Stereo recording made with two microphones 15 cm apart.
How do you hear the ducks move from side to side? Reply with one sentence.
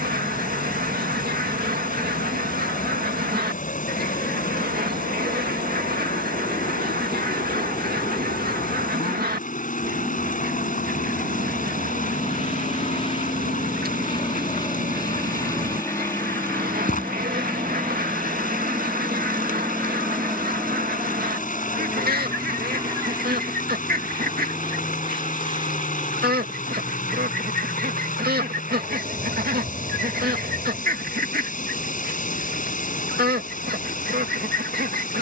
In this clip you hear the ducks stay in one place.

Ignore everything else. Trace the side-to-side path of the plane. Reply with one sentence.
You can hear the plane go from the left side to the right.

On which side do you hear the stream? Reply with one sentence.
In this clip you hear the stream on the left.